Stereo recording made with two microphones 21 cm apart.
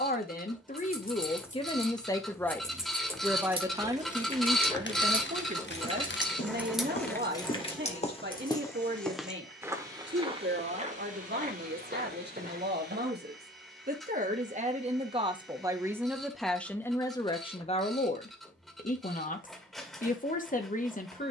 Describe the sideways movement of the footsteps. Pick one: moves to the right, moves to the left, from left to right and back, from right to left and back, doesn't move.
moves to the right.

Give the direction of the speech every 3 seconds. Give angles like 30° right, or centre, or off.
30° left, 30° right, 50° right, 60° right, 50° right, centre, 40° left.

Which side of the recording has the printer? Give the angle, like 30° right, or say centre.
centre.